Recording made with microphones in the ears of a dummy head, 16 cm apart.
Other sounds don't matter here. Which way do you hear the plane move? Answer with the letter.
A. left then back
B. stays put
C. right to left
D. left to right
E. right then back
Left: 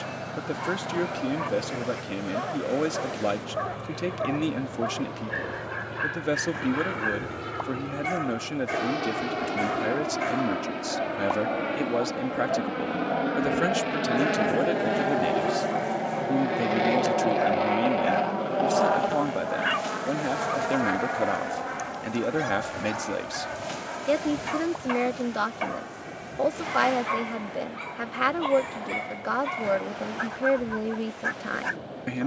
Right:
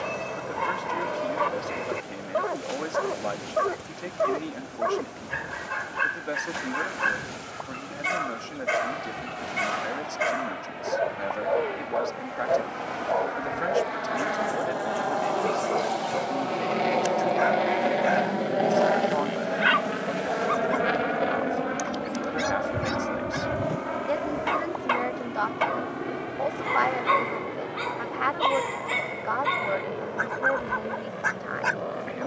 D.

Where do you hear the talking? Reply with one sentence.
You can hear the talking on the left.